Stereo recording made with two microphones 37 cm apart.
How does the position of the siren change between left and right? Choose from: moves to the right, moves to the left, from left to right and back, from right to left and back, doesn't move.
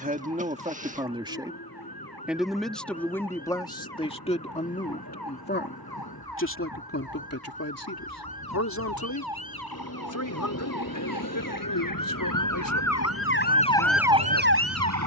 moves to the right.